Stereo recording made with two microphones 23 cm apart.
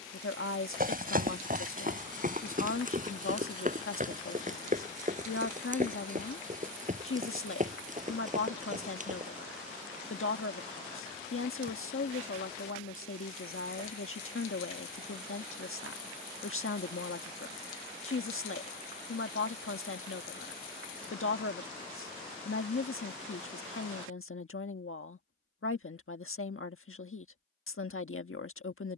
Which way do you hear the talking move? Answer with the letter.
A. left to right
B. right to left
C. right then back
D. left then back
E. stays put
E.